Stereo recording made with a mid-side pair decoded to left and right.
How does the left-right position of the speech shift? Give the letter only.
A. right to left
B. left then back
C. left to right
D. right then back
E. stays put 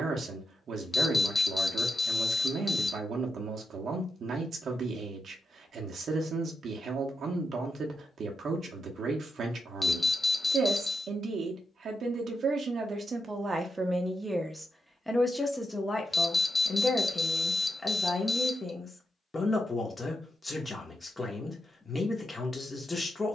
A.